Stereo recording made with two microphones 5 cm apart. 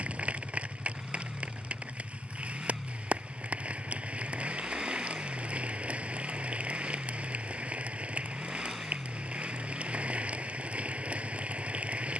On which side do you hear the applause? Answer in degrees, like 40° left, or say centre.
20° right.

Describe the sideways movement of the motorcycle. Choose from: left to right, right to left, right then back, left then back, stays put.
stays put.